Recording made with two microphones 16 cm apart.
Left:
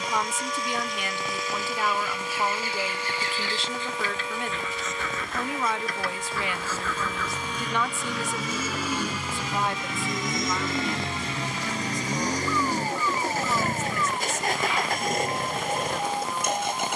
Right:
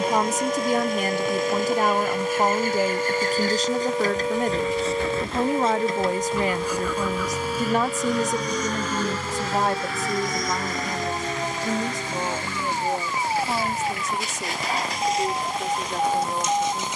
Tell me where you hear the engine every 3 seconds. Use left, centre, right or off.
right, right, centre, left, left, left.